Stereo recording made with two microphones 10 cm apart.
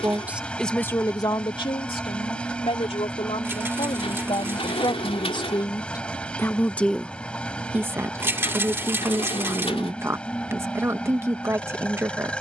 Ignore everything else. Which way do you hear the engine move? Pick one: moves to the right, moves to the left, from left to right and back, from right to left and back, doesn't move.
doesn't move.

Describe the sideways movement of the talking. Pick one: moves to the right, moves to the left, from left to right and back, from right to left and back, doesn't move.
from right to left and back.